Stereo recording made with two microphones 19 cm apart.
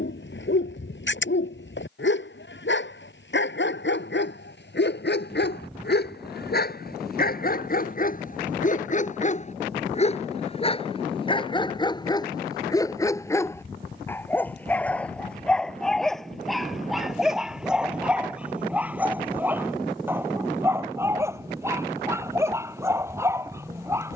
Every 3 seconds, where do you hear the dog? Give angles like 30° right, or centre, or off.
70° left, 70° left, 50° left, 30° left, 10° left, centre, 10° right, 10° right.